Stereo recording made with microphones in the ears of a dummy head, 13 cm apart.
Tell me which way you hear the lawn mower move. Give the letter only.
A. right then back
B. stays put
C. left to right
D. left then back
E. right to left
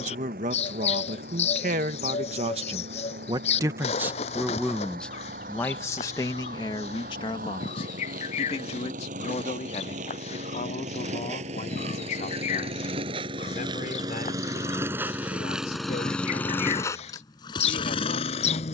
E.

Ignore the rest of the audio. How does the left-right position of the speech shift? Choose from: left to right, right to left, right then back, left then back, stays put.
right to left.